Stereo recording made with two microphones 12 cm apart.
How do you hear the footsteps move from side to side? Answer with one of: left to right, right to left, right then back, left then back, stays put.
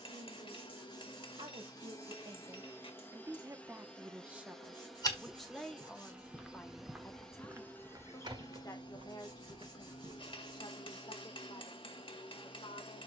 left to right.